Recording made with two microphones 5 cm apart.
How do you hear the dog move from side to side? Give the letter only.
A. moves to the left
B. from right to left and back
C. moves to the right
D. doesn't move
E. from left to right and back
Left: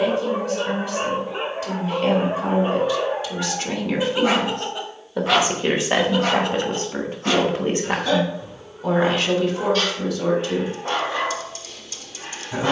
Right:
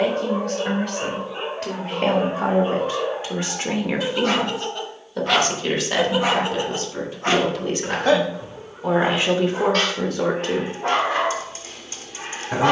C.